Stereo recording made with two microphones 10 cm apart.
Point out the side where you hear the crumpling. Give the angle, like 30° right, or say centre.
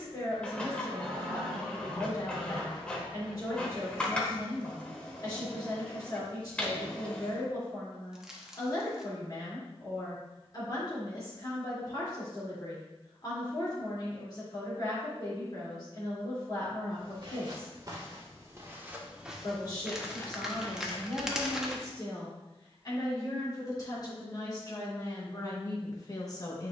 10° right.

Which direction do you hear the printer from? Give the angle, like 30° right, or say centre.
10° left.